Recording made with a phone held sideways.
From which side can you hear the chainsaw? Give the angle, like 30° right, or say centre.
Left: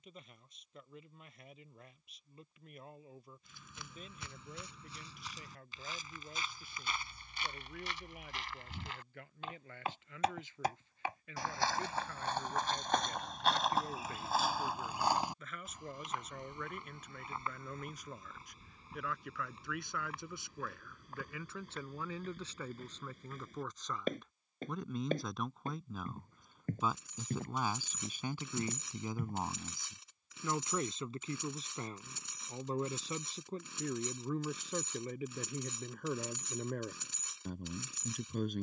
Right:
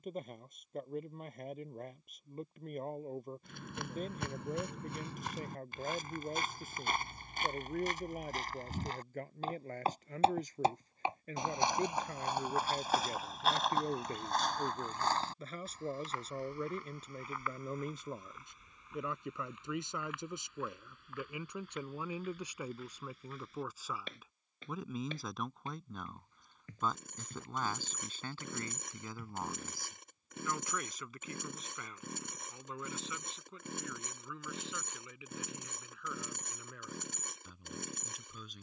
60° right.